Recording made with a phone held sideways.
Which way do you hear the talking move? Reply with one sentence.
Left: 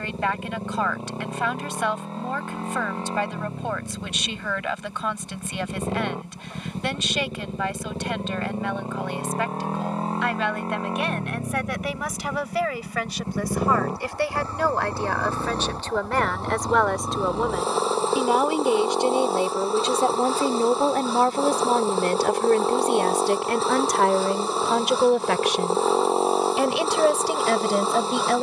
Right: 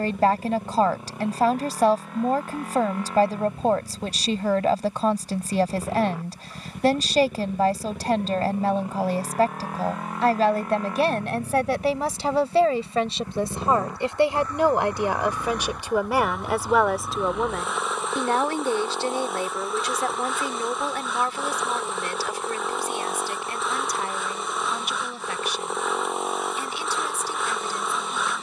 You can hear the talking move to the left.